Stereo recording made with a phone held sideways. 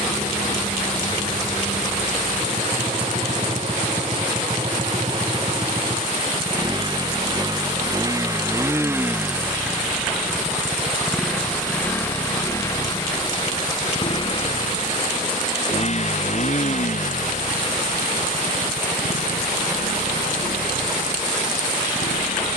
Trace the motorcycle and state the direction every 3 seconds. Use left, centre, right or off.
right, right, right, centre, left, left, left, left.